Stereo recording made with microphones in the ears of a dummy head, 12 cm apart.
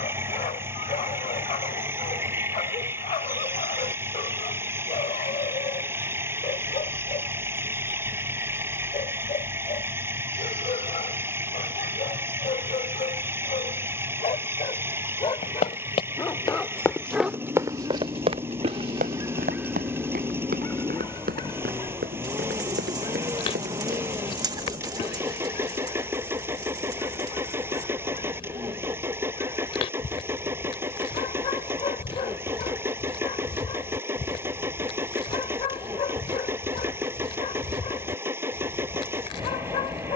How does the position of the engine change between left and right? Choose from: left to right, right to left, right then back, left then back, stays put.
stays put.